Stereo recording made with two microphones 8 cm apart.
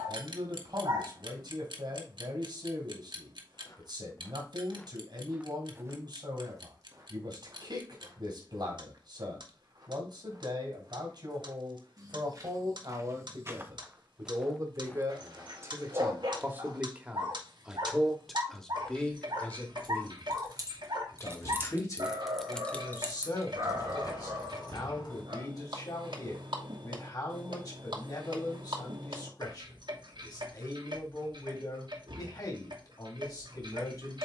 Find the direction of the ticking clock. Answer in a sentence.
In this clip you hear the ticking clock on the right.